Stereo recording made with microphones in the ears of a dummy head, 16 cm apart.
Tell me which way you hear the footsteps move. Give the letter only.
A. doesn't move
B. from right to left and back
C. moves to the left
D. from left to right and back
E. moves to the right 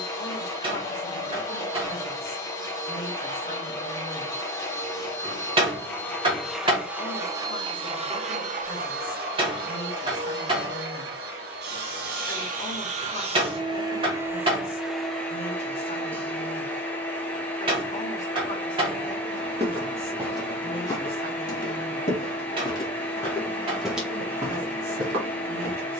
B.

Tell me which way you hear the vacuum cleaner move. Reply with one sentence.
You can hear the vacuum cleaner go right and come back.